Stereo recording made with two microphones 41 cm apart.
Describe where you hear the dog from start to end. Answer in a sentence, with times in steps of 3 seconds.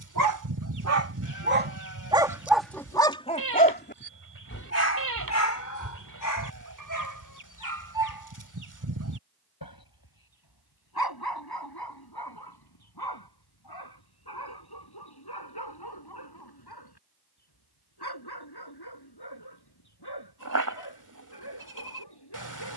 In this clip you hear the dog on the right from 0 s and on the left from 3 s.